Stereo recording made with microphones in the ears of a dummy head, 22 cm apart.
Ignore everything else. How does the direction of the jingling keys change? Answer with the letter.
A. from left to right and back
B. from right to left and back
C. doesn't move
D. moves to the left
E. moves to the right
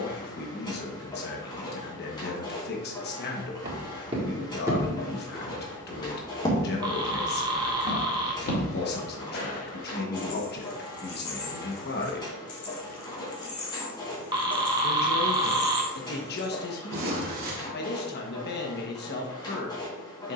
E.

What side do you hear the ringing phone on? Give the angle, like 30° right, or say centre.
20° right.